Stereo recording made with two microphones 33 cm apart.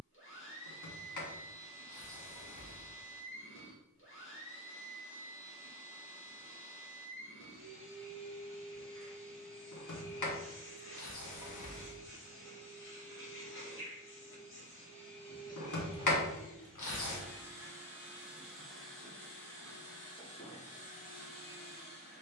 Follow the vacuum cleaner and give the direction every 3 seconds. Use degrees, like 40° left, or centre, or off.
40° left, 40° left, 40° left, 40° left, 40° left, 10° left, 10° left, 30° left.